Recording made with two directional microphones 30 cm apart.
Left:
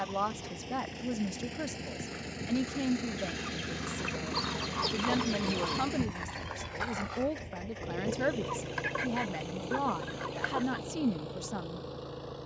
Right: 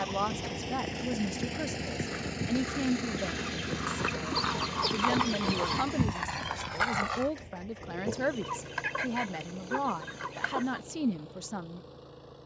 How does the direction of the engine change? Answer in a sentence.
You can hear the engine go from the right side to the left.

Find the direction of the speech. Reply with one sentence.
You can hear the speech in the centre.